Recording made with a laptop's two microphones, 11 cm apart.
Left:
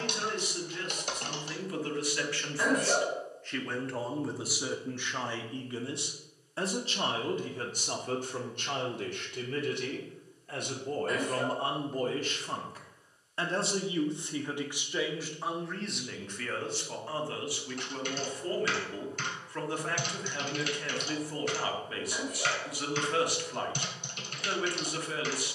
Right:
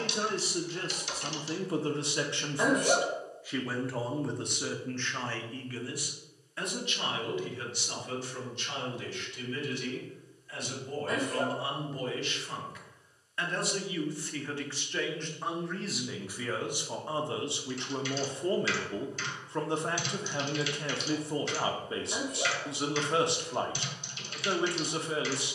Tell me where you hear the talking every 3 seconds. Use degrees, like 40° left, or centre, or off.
30° right, 10° left, 40° left, 50° left, 30° left, 10° right, 30° right, 30° right, 30° right.